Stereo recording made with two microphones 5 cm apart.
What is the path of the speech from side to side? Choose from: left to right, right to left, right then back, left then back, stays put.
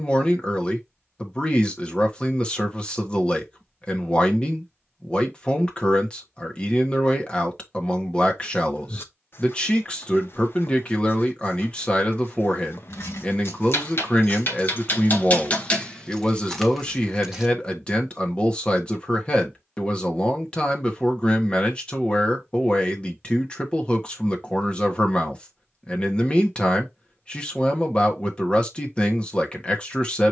stays put.